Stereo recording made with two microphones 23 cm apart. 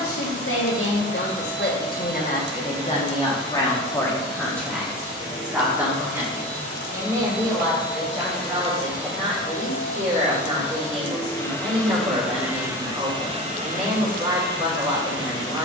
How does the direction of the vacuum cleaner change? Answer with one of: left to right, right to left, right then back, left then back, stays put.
left to right.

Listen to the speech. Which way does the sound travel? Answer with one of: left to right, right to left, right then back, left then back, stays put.
left to right.